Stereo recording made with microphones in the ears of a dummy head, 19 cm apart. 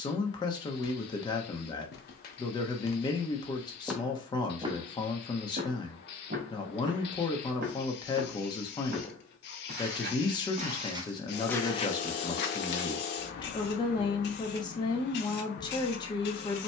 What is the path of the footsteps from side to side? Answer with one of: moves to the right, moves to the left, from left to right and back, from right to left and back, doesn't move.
from left to right and back.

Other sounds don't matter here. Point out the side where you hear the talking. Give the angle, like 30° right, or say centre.
20° left.